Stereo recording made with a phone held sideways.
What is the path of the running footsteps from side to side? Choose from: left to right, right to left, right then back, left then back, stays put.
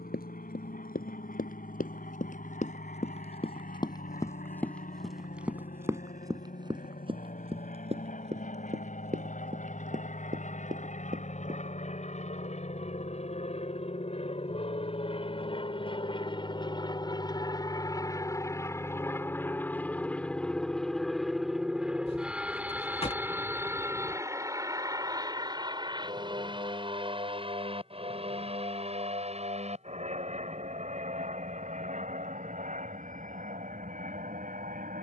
left to right.